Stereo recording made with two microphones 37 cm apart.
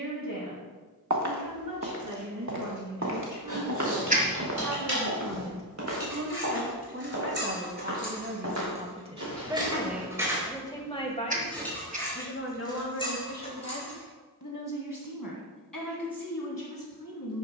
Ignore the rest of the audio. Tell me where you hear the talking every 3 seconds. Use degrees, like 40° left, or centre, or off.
60° right, 50° right, 30° right, centre, 40° left, 60° left.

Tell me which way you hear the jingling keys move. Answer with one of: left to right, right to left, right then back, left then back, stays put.
right to left.